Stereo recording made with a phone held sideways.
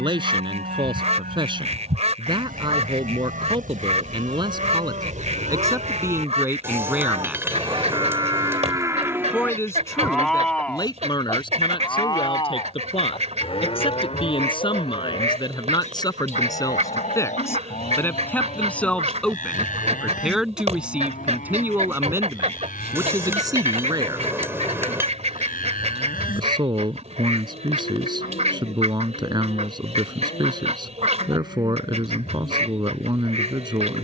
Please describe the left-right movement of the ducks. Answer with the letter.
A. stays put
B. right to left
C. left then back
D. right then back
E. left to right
A.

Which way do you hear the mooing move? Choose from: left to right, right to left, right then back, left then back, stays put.
right to left.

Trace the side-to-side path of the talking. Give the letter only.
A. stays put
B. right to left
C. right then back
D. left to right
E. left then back
E.